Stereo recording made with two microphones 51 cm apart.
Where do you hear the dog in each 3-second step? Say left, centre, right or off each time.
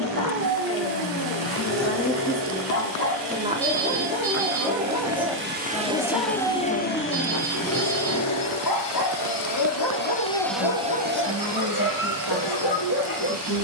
right, centre, left, left, left.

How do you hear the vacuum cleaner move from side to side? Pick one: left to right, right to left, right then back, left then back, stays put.
left then back.